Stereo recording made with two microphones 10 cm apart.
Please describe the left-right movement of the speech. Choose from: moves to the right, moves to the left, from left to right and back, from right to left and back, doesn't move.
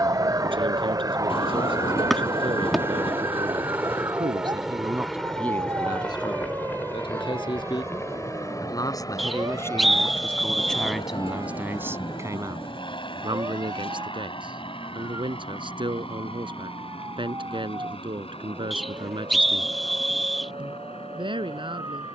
from right to left and back.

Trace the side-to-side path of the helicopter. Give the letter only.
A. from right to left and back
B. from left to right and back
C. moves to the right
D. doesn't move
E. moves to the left
E.